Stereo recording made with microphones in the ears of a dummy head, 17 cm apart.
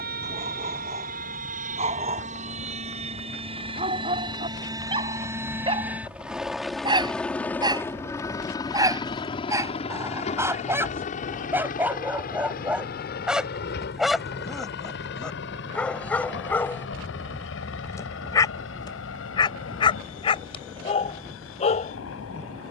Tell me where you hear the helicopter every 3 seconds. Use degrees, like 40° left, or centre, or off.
40° right, 20° right, 10° left, 30° left, 50° left, 60° left, 70° left, 70° left.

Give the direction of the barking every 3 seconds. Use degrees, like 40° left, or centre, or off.
30° right, 30° right, 20° right, 10° right, centre, 10° left, 20° left, 30° left.